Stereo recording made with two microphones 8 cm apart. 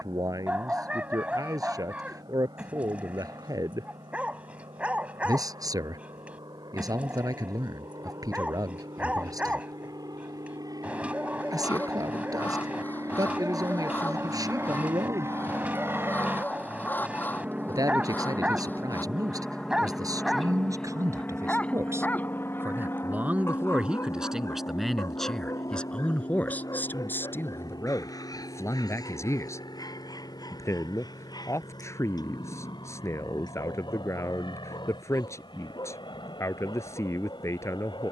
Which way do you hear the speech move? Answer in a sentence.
In this clip you hear the speech move from right to left.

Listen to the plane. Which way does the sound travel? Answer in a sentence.
In this clip you hear the plane move from right to left.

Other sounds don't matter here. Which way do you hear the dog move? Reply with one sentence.
You can hear the dog go from the right side to the left.